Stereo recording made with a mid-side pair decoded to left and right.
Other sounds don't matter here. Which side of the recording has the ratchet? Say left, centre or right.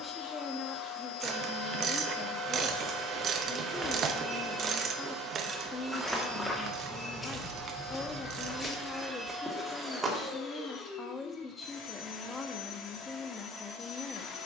right.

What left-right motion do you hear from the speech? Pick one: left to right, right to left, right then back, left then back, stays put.
stays put.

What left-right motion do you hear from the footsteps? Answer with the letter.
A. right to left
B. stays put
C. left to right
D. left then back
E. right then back
D.